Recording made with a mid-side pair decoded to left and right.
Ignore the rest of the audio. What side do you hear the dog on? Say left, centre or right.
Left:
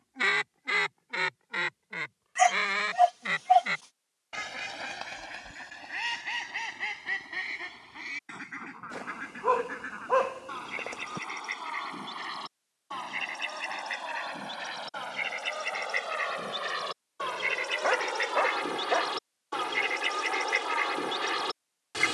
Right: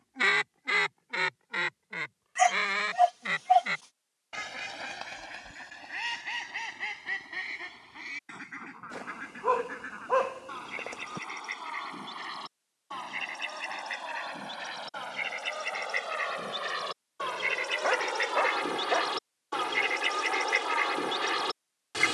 centre.